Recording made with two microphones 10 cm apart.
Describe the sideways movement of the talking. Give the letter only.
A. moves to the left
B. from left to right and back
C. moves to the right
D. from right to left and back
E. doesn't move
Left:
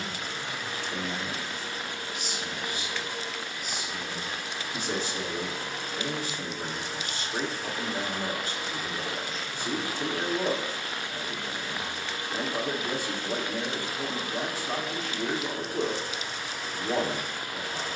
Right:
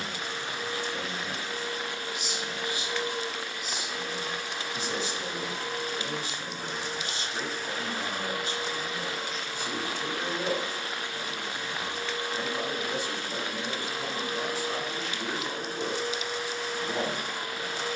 E.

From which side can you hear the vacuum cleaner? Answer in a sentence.
In this clip you hear the vacuum cleaner on the right.